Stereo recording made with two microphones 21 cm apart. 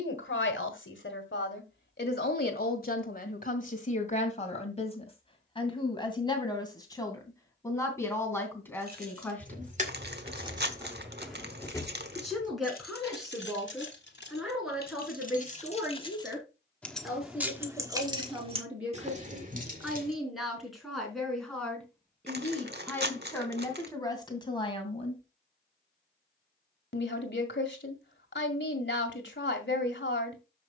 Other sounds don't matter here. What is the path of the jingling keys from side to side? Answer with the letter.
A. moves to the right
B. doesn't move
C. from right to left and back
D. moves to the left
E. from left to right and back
C.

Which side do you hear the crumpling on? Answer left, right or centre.
right.